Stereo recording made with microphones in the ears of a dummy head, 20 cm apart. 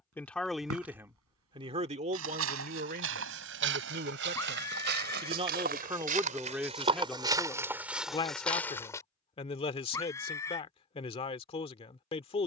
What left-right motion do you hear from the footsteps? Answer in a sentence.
You can hear the footsteps go from the right side to the left.